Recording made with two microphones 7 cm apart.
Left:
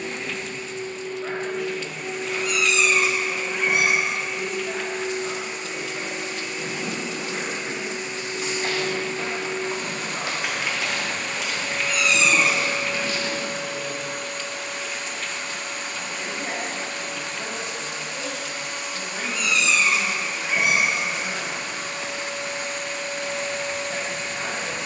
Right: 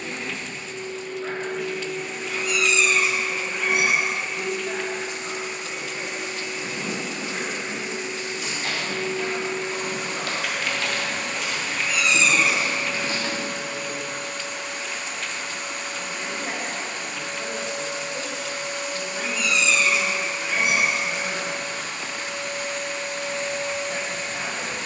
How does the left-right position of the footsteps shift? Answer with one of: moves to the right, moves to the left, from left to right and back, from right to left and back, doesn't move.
moves to the right.